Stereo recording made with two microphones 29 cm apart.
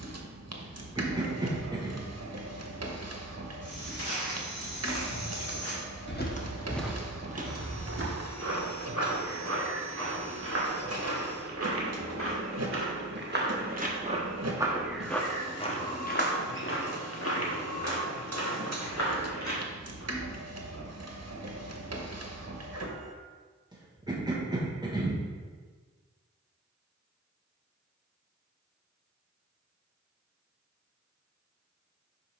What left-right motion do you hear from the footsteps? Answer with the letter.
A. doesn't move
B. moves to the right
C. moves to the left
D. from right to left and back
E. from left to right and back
E.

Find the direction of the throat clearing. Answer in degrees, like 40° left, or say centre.
10° right.